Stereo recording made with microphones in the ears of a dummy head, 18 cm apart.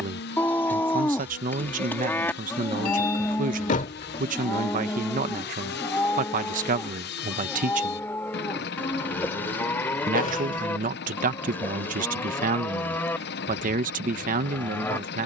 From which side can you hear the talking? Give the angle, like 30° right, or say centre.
40° right.